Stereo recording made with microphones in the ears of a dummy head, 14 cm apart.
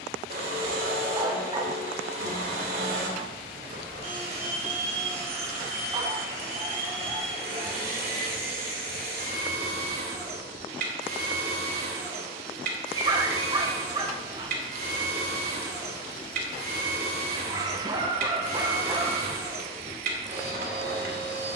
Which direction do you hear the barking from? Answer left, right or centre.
right.